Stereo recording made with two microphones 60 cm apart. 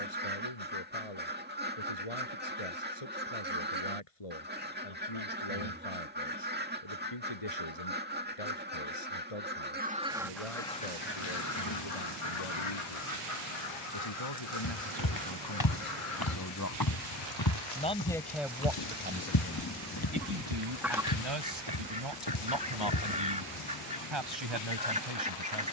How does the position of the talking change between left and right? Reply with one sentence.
You can hear the talking travel towards the right.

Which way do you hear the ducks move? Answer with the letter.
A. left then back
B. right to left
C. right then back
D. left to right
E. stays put
A.